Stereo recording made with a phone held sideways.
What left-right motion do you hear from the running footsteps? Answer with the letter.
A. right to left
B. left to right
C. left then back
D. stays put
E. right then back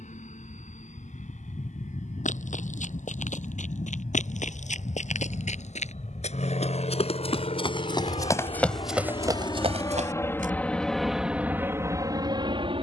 B.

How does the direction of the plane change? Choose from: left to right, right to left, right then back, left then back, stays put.
left to right.